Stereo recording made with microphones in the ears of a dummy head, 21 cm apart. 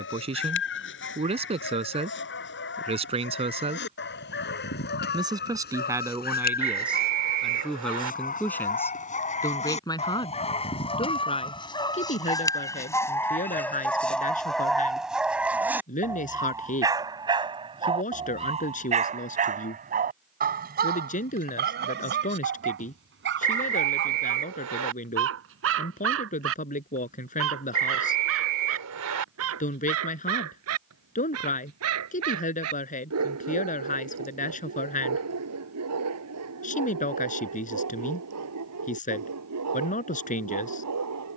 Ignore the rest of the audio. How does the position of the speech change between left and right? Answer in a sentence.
You can hear the speech move from right to left.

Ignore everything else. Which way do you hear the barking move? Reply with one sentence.
You can hear the barking move from left to right.